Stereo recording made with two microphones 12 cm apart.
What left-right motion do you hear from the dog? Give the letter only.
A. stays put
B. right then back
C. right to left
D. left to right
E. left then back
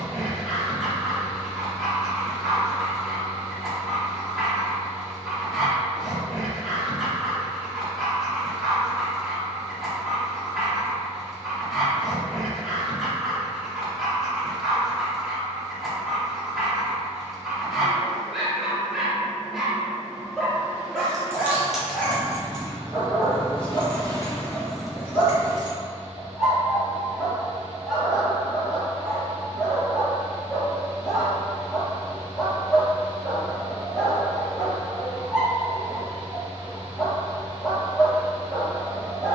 A.